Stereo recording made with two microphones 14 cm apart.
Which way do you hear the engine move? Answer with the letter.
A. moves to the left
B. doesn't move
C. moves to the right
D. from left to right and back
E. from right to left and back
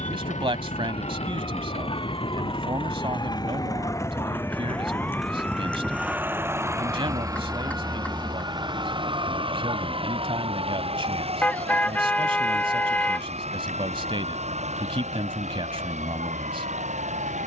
C.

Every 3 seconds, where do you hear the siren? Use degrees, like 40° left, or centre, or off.
40° left, 20° left, 10° right, 40° right, 60° right, 70° right.